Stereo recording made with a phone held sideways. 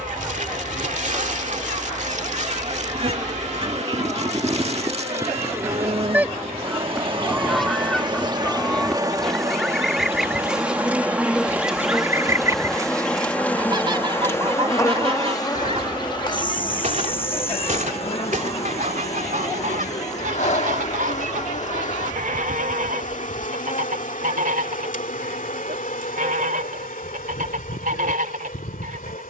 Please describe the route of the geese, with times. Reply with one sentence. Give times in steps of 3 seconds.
In this clip you hear the geese on the right from 0 s, in the centre from 6 s and on the right from 12 s.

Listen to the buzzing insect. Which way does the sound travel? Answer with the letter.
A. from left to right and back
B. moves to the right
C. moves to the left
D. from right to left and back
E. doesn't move
C.